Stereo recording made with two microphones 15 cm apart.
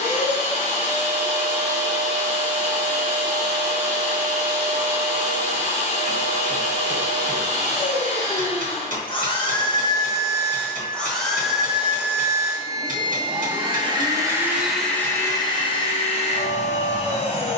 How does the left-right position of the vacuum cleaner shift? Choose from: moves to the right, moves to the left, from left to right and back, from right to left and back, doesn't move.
from left to right and back.